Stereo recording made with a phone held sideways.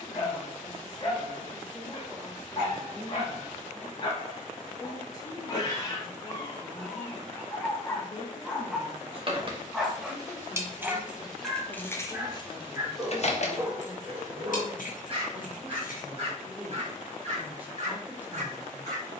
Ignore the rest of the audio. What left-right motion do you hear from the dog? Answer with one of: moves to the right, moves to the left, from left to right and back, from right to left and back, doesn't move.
moves to the right.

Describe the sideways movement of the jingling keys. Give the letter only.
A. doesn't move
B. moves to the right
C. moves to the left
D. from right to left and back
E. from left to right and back
C.